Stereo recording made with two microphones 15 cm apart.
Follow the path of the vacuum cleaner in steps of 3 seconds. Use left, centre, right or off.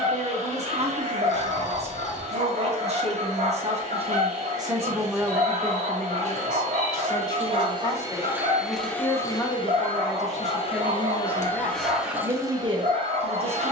right, right, right, left, right.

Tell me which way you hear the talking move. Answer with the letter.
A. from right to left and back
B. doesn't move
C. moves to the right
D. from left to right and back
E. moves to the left
A.